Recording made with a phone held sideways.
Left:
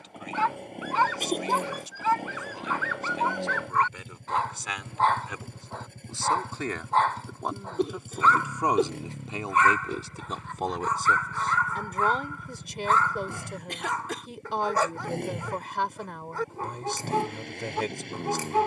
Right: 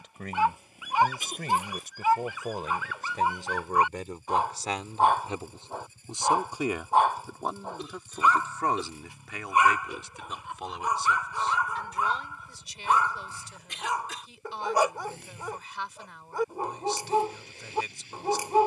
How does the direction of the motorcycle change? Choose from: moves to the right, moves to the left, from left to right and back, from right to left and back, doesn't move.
doesn't move.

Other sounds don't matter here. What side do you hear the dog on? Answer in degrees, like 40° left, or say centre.
10° right.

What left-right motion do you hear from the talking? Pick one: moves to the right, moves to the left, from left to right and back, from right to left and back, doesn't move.
moves to the left.